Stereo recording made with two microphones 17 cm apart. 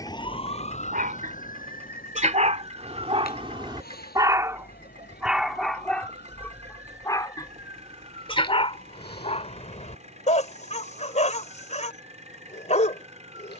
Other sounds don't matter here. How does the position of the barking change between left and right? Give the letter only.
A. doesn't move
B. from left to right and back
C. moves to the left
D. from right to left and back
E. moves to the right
C.